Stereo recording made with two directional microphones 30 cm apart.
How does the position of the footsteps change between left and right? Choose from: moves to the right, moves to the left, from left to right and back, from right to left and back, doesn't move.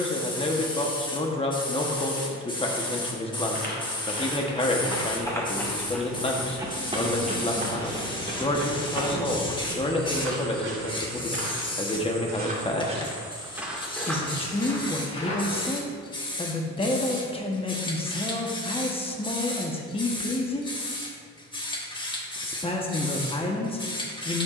from left to right and back.